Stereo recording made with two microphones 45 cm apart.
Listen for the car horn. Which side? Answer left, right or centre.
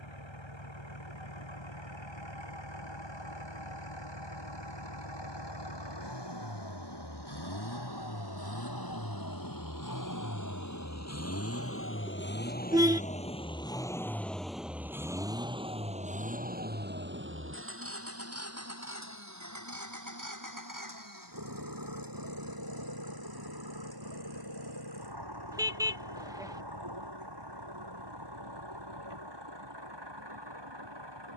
centre.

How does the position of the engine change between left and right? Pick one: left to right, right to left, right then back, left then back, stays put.
left to right.